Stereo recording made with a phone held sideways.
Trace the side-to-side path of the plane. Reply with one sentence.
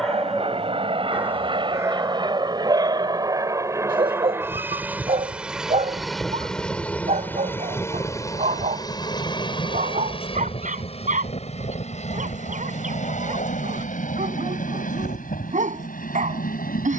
You can hear the plane move to the left.